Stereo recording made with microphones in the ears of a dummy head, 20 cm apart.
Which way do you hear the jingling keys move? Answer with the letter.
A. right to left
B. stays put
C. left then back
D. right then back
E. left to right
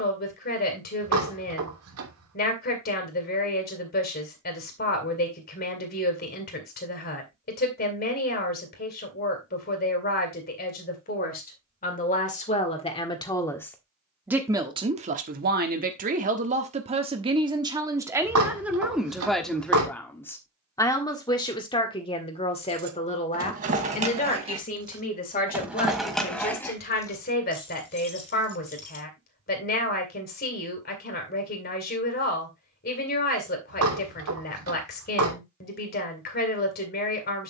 A.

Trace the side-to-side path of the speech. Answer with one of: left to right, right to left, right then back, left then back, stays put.
right then back.